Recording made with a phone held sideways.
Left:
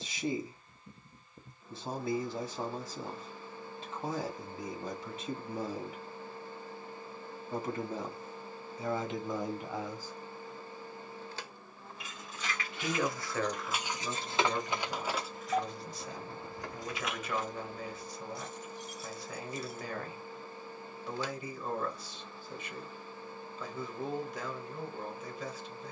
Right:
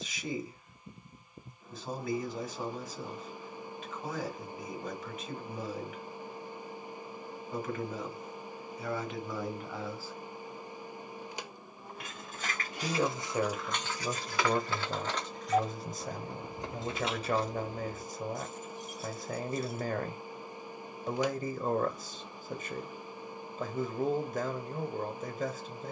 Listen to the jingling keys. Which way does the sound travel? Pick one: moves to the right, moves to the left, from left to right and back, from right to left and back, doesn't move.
from right to left and back.